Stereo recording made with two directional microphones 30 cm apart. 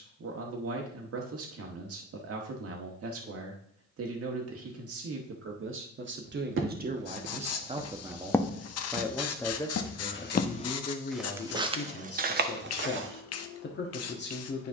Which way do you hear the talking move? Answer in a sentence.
In this clip you hear the talking travel towards the left.